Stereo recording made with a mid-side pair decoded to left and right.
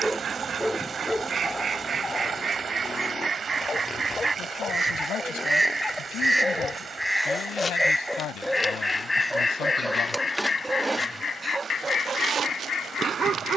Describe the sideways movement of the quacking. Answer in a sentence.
You can hear the quacking go from the right side to the left.